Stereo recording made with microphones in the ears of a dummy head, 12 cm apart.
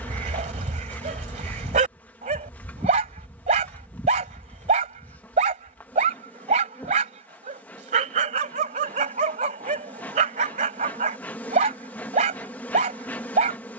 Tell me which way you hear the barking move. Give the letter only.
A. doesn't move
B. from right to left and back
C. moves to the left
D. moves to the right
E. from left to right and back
A.